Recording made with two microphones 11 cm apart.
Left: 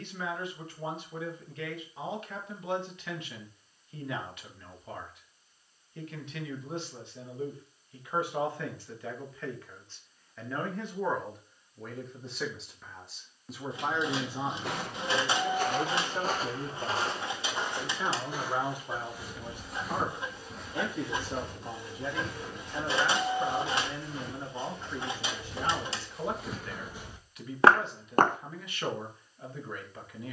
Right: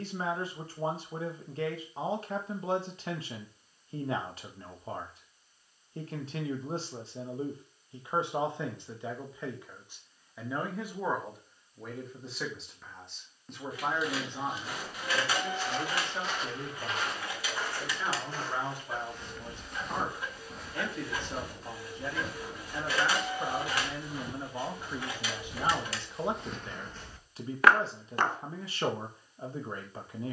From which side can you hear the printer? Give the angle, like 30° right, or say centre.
20° left.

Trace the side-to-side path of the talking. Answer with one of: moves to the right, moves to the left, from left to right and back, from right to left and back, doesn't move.
from right to left and back.